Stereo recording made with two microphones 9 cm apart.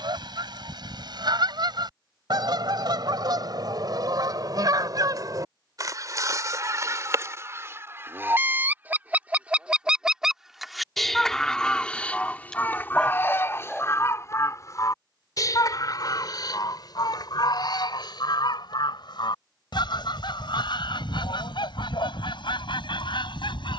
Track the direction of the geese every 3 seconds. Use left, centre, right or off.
right, right, right, centre, left, left, left, left.